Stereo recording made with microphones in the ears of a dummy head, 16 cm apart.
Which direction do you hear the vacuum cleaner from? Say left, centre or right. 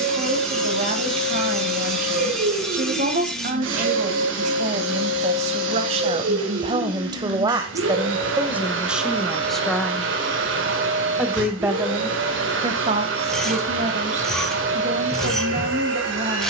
right.